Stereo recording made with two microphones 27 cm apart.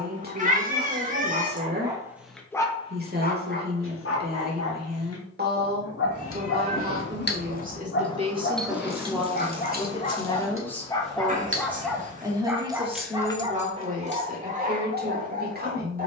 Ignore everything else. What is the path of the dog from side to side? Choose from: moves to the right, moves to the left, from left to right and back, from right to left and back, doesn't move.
from right to left and back.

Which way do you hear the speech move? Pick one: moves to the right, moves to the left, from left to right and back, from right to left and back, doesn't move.
from right to left and back.